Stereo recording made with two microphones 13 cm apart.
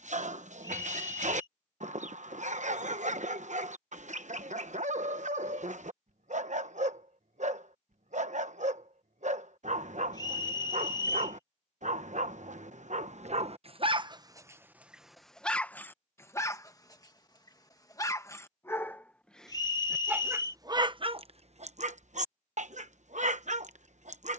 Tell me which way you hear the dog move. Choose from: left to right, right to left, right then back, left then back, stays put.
left then back.